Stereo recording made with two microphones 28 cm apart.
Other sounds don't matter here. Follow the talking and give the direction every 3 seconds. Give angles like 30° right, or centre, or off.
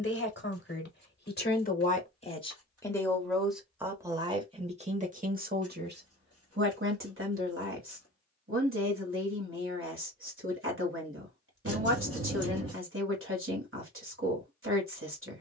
30° left, 20° right, 50° right, 50° right, 50° right.